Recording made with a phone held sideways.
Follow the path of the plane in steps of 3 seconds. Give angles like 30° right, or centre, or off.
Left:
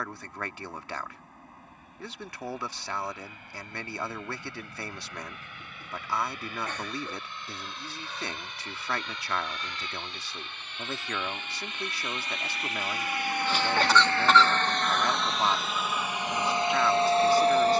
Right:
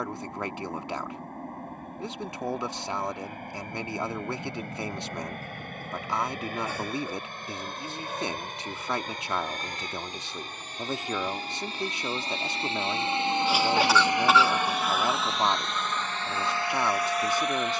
60° right, 60° right, 50° right, 40° right, 20° right, 20° left.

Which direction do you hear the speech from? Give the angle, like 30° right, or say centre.
20° right.